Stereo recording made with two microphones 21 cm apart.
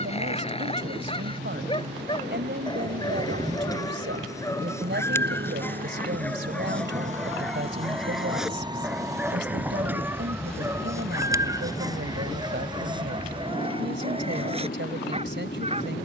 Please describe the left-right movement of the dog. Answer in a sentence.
You can hear the dog move to the right.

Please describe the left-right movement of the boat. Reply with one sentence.
In this clip you hear the boat travel towards the left.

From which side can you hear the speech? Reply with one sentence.
In this clip you hear the speech on the right.